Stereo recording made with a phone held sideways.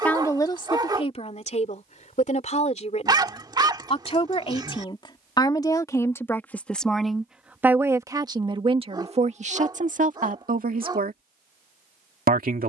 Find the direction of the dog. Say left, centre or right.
right.